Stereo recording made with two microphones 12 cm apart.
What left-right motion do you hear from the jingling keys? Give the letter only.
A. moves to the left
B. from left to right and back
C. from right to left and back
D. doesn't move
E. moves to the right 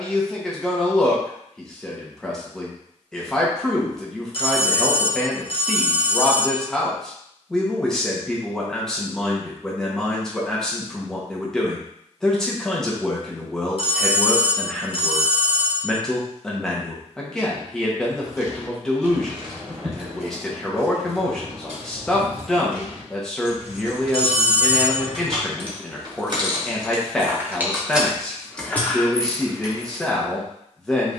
B.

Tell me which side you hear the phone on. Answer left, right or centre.
left.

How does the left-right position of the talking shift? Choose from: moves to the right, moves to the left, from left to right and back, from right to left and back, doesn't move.
doesn't move.